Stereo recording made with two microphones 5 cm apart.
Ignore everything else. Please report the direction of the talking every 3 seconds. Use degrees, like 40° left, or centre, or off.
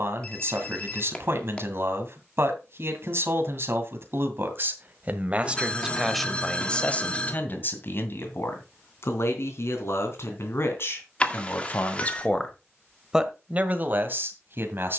50° right, 40° right, 30° left, 60° left, 20° right.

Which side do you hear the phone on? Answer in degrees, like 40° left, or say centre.
30° left.